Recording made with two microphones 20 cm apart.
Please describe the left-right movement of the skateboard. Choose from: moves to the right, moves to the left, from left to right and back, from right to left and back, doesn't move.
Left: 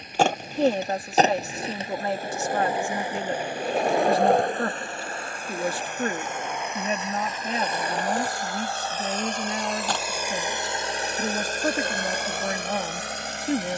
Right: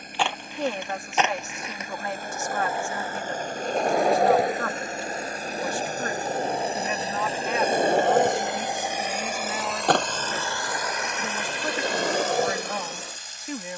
moves to the right.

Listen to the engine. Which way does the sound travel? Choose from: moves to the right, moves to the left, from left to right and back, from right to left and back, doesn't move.
moves to the left.